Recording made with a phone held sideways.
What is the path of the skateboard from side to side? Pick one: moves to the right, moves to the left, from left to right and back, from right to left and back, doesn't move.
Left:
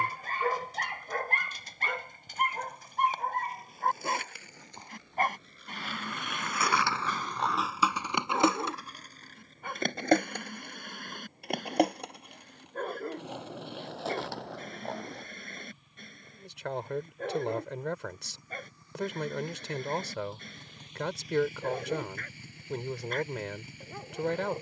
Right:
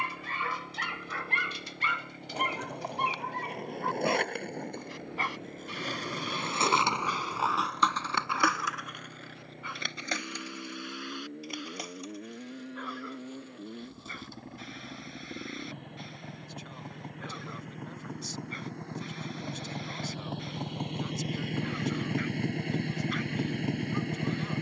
moves to the left.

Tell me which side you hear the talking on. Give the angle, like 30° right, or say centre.
70° left.